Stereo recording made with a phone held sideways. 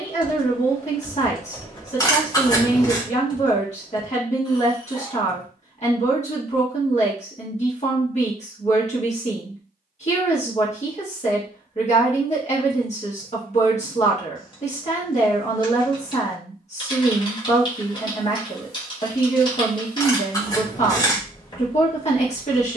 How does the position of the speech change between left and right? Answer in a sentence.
In this clip you hear the speech stay put.